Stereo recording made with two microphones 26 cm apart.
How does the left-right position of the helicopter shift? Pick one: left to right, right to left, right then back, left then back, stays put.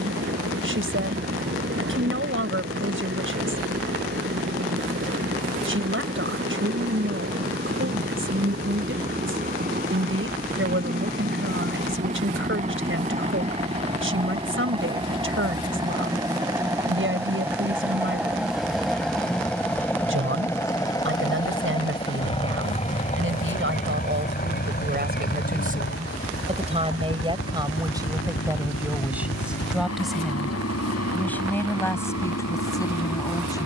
right to left.